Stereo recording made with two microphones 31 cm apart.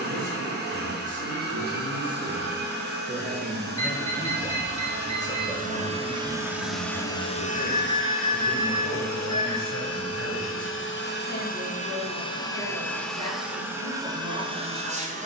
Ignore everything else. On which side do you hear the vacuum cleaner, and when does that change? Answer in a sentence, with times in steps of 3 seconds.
You can hear the vacuum cleaner on the right from 0 s, on the left from 6 s and in the centre from 12 s.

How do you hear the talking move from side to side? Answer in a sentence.
You can hear the talking move from right to left.